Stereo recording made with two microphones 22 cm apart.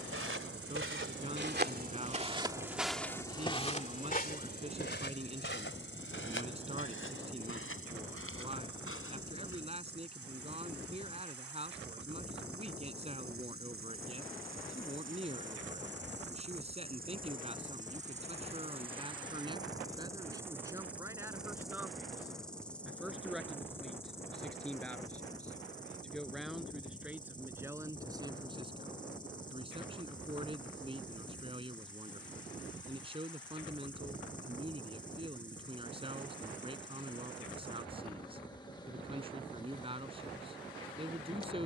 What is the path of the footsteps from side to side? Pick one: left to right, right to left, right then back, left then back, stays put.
right to left.